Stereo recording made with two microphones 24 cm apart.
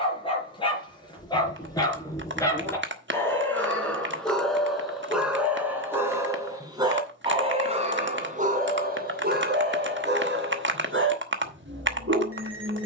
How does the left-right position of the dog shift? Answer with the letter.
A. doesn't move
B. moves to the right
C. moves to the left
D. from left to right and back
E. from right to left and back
B.